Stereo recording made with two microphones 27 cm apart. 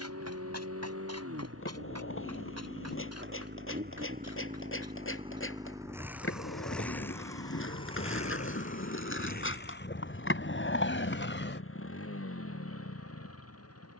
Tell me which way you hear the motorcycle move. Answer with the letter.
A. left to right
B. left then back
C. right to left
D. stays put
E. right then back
C.